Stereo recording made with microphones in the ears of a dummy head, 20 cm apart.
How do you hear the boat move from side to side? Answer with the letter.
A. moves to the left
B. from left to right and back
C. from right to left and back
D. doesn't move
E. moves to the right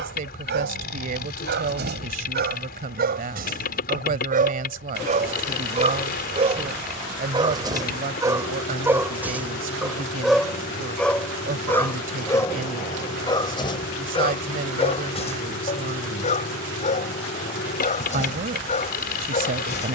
D.